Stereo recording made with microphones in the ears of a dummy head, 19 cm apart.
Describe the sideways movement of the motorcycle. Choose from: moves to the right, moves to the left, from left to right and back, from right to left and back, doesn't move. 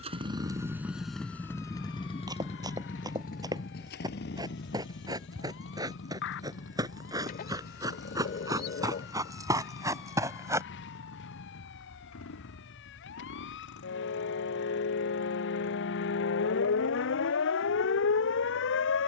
moves to the left.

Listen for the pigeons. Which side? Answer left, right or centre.
left.